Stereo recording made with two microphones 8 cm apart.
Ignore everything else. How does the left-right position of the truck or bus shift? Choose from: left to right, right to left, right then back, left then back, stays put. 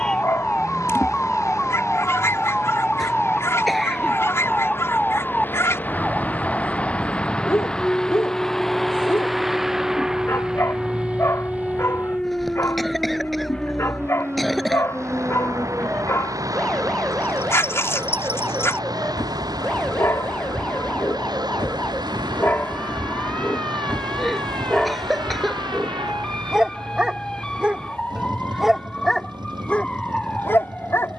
left to right.